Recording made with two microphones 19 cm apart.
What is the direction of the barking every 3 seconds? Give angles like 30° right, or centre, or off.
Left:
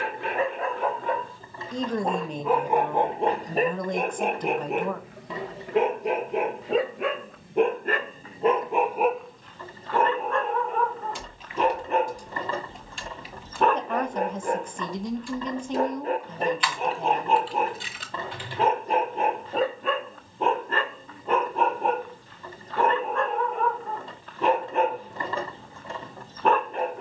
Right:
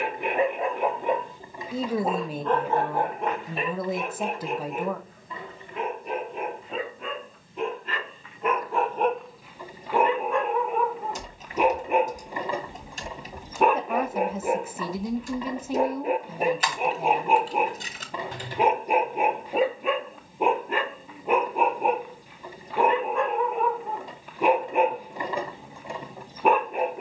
10° right, 60° left, 50° left, 10° right, 10° right, 10° right, 10° right, 10° right, 10° right.